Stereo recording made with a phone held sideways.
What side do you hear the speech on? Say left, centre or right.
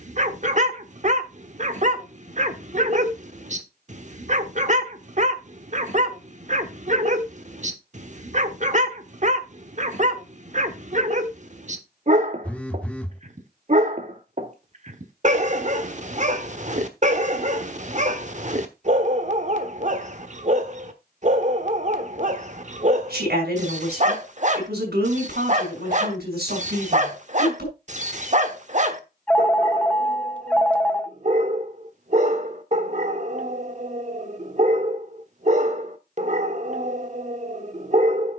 right.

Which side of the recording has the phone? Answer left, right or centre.
centre.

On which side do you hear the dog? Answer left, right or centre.
right.